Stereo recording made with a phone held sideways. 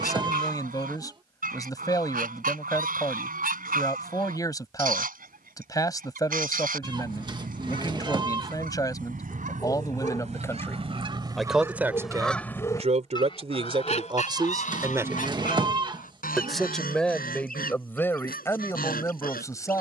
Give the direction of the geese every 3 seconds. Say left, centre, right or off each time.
right, right, right, right, left, left, left.